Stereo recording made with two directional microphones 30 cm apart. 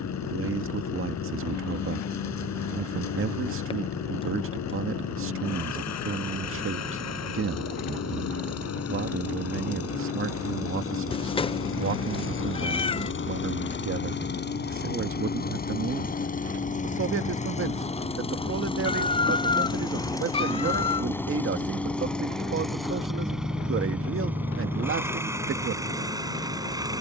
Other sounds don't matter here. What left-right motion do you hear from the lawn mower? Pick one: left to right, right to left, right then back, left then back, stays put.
left to right.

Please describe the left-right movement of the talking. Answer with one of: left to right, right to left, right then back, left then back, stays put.
stays put.